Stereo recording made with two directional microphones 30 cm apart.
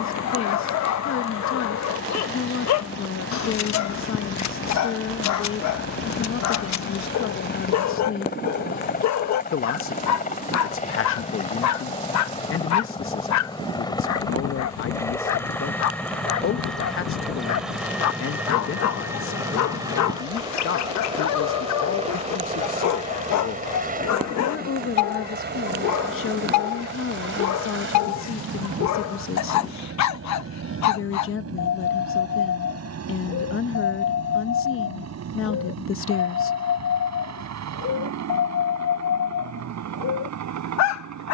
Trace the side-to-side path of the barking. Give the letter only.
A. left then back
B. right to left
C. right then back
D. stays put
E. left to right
D.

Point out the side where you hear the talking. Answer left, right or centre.
left.